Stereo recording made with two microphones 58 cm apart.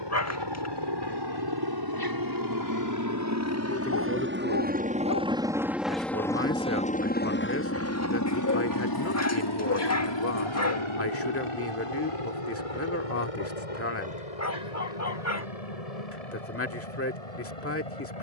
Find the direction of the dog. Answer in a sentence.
In this clip you hear the dog on the left.